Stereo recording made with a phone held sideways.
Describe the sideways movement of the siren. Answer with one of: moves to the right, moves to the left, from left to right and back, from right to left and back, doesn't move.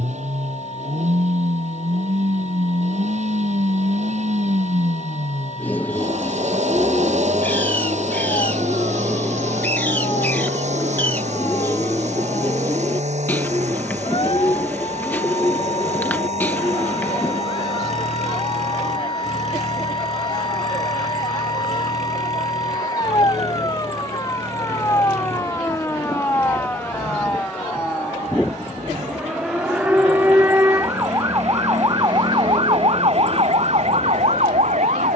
moves to the right.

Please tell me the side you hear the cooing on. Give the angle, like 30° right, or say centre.
10° left.